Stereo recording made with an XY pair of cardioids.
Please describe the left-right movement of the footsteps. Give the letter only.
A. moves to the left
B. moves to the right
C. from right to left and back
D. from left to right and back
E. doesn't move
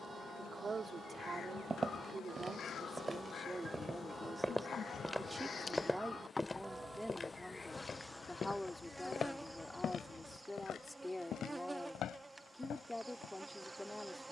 A.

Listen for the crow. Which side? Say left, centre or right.
left.